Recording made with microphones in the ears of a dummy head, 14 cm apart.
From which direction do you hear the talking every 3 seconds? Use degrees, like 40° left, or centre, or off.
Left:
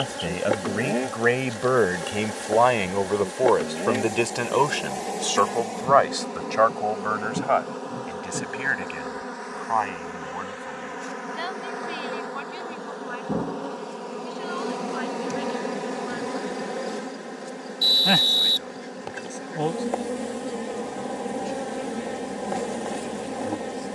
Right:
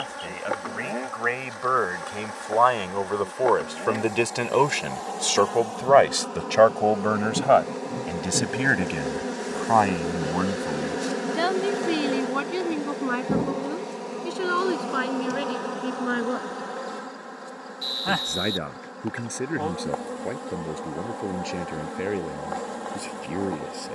40° left, 10° right, 40° right, 60° right, 70° right, 70° right, 70° right, 80° right.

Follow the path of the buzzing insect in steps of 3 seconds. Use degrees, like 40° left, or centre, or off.
30° left, 20° left, 10° right, 40° right, 10° right, 20° left, 20° left, 20° left.